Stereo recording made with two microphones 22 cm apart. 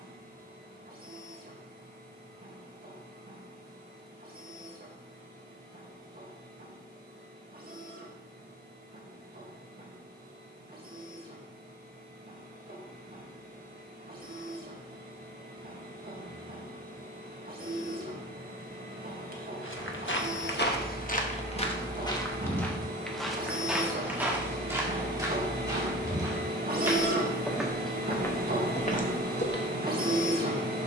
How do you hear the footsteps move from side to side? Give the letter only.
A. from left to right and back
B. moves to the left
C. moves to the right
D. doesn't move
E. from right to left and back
A.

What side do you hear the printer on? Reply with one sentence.
In this clip you hear the printer on the right.